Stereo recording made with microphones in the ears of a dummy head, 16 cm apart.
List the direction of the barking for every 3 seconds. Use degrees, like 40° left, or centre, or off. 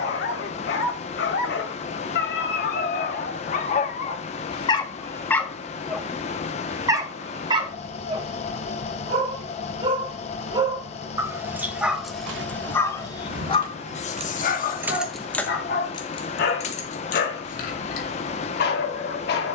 60° left, 30° left, 20° right, 20° right, 30° left, 60° left, 60° left.